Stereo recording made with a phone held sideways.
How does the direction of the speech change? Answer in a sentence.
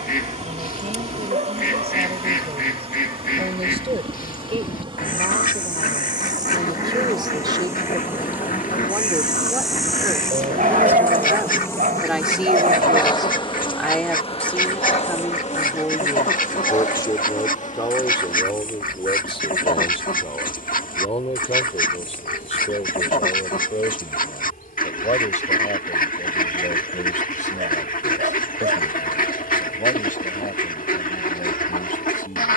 You can hear the speech move to the left.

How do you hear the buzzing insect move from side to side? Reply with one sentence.
You can hear the buzzing insect travel towards the left.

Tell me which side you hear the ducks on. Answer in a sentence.
You can hear the ducks on the left.